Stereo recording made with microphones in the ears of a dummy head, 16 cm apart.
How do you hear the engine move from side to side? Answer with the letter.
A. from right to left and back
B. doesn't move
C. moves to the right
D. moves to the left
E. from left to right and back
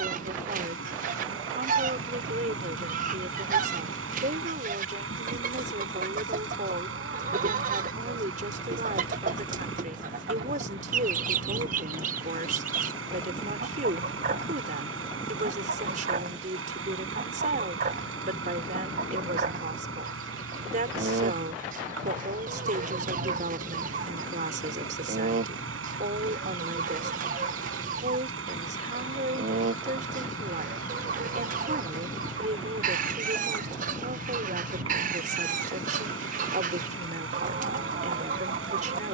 B.